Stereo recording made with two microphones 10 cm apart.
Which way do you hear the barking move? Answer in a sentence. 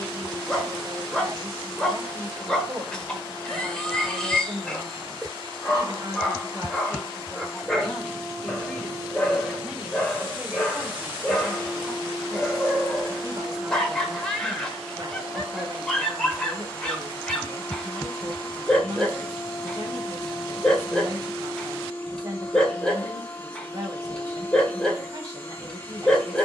In this clip you hear the barking stay put.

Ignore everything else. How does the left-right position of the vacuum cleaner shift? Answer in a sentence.
In this clip you hear the vacuum cleaner move to the left.